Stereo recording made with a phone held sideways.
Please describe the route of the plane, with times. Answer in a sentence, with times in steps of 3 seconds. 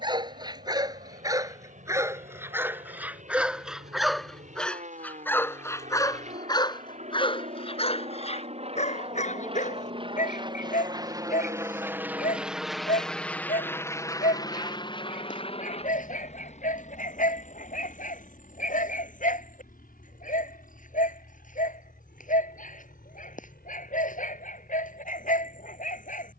In this clip you hear the plane on the right from 0 s, in the centre from 12 s and on the left from 15 s.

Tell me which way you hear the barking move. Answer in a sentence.
You can hear the barking move to the left.